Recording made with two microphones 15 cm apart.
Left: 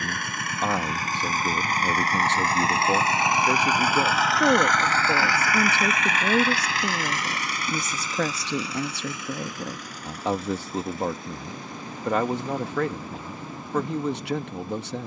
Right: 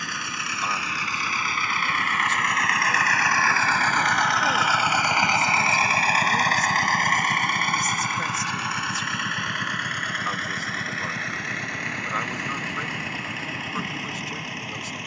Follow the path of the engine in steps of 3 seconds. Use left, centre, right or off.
left, centre, right, right, right.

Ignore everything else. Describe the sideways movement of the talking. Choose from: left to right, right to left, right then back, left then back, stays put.
stays put.